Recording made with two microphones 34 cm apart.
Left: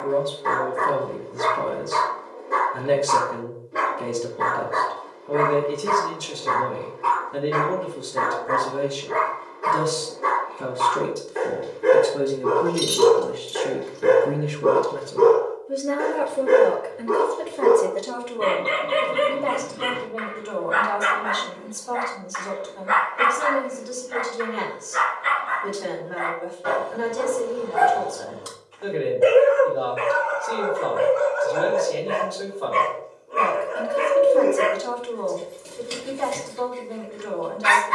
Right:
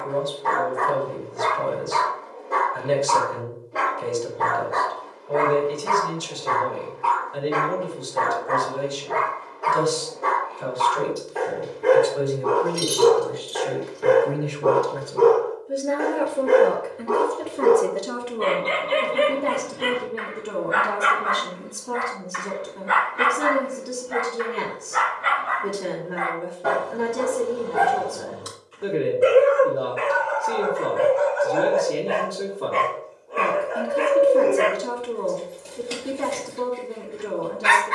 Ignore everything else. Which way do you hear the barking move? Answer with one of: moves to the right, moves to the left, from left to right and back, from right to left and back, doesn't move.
from left to right and back.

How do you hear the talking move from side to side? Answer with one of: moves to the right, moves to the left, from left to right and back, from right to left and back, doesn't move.
moves to the right.